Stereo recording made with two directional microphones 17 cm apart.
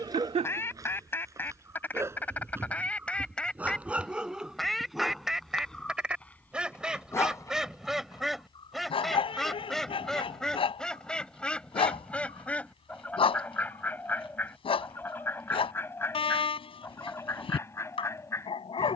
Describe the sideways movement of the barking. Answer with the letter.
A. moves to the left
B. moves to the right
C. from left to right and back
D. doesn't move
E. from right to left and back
A.